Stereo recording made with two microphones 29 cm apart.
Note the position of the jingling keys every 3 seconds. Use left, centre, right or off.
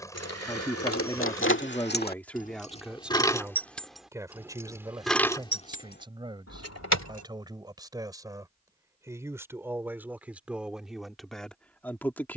left, centre, left, off.